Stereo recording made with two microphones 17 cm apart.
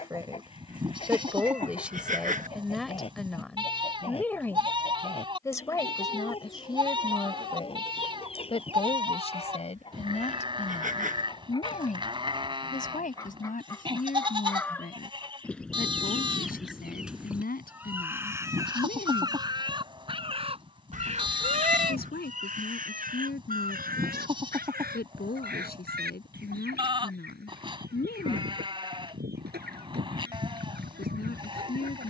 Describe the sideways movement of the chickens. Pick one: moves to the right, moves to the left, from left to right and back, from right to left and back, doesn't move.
moves to the right.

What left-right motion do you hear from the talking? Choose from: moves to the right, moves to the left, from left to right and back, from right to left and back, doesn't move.
moves to the left.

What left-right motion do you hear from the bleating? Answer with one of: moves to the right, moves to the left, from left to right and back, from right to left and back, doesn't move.
doesn't move.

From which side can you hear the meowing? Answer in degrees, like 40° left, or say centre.
50° right.